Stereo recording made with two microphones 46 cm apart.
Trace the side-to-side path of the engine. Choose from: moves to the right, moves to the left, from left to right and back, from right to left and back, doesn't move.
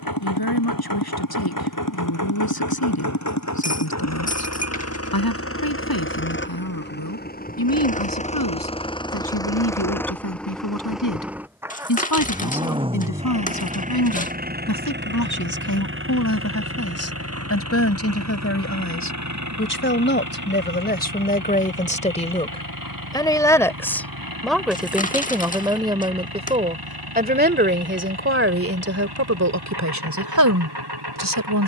moves to the right.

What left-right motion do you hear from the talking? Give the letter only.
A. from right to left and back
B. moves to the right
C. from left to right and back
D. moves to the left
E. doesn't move
B.